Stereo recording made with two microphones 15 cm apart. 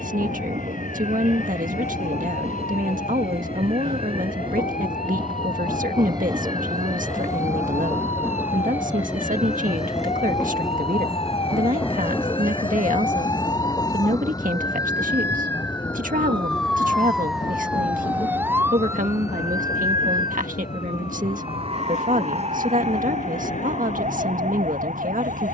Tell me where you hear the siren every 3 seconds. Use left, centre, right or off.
left, left, left, left, left, centre, right, right, right.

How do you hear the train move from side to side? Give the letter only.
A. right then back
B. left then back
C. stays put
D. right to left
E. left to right
D.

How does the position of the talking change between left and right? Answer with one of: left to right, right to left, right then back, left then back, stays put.
stays put.